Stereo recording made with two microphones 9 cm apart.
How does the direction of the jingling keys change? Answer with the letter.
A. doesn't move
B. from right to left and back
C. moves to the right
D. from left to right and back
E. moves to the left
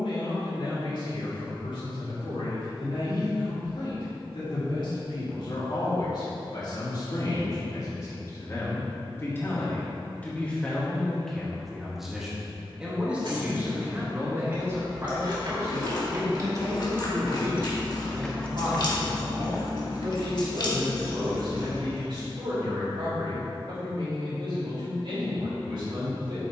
E.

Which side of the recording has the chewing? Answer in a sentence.
In this clip you hear the chewing on the left.